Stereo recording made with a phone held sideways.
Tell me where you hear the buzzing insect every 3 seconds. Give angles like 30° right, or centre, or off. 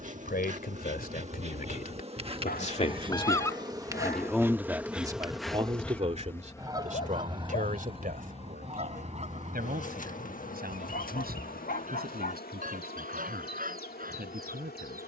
40° right, 10° right, 30° left, 60° left, 70° left.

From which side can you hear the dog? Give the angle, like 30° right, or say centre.
70° left.